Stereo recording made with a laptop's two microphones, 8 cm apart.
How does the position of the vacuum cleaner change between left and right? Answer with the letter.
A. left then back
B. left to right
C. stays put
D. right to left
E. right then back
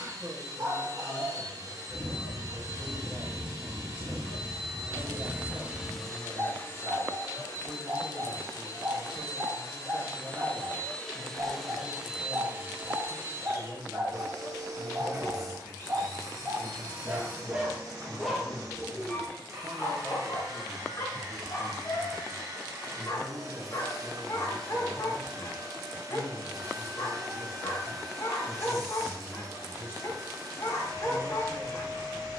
A.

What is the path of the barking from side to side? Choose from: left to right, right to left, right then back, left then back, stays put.
right to left.